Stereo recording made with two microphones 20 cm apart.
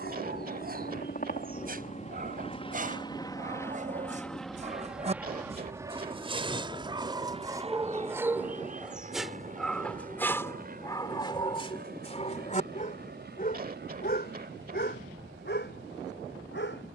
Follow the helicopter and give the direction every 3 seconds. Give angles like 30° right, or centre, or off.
40° left, centre, 30° right, 40° right, 50° right, 50° right.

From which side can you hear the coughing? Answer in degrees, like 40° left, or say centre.
50° right.